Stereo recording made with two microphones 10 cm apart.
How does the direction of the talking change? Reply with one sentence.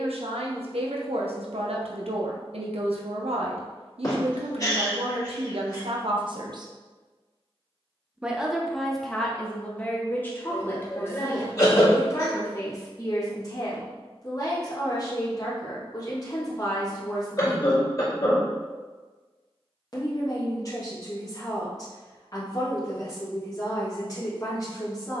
You can hear the talking move to the left.